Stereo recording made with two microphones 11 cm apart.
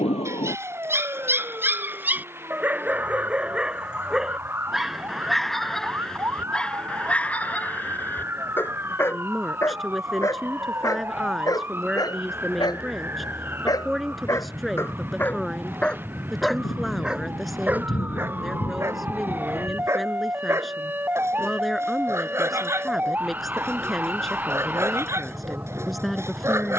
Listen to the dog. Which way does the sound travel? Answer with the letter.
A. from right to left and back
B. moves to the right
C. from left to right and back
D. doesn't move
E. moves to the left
A.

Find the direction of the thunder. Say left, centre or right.
left.